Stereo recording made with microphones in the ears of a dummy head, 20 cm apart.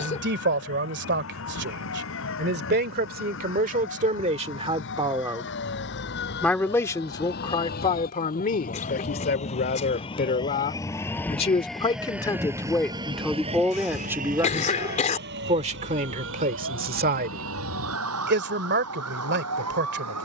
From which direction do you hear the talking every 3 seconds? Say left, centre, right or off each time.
right, right, left, left, centre, right, right.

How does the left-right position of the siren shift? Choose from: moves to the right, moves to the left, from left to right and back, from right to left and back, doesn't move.
moves to the right.